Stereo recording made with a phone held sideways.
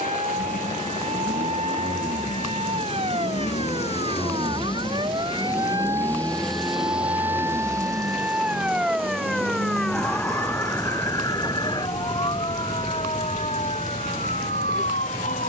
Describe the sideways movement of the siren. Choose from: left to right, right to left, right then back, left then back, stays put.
right to left.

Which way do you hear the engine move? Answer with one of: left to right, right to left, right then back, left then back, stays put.
left to right.